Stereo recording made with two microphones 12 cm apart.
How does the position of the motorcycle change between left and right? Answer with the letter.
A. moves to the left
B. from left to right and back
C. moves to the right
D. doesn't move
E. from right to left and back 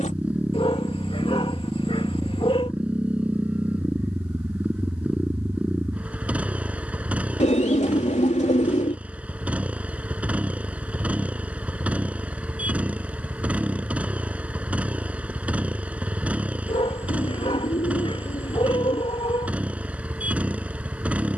D.